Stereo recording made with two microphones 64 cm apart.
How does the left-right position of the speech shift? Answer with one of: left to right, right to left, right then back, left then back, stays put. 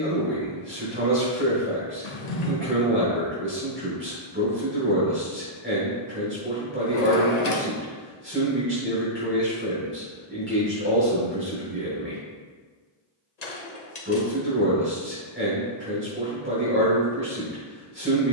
stays put.